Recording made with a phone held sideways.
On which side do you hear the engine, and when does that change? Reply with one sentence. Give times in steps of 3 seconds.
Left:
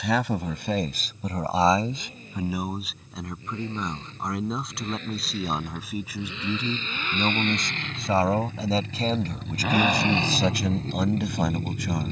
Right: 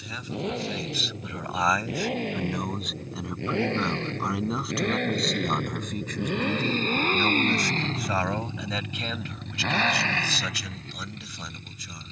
You can hear the engine on the right from 0 s and on the left from 9 s.